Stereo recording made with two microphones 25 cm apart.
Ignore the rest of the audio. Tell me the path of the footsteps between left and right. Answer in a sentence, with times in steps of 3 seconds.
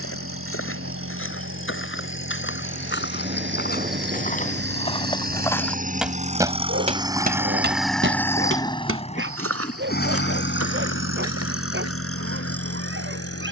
In this clip you hear the footsteps on the left from 0 s, on the right from 6 s and not at all from 12 s.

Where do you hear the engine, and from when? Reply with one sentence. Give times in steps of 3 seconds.
You can hear the engine on the right from 0 s, in the centre from 6 s and on the left from 9 s.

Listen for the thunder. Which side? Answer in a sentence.
You can hear the thunder on the right.